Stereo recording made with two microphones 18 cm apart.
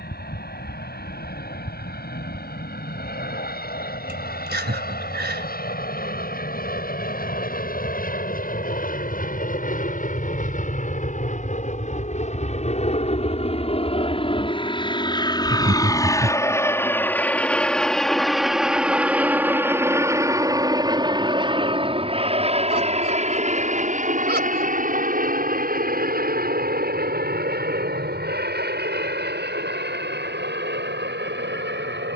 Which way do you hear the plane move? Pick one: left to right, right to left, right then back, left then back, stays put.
left to right.